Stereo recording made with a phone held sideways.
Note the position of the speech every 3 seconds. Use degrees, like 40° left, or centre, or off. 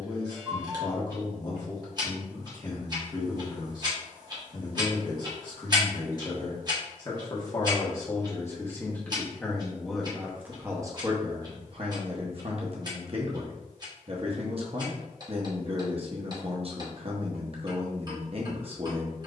30° left, 30° left, 20° left, 20° right, 40° right, 40° right, 40° right.